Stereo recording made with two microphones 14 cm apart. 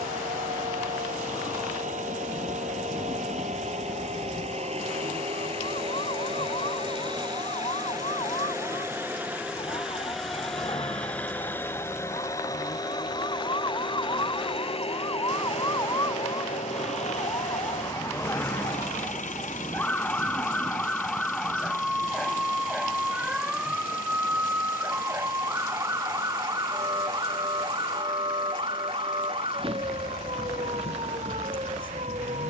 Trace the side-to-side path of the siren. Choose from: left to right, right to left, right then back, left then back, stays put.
left to right.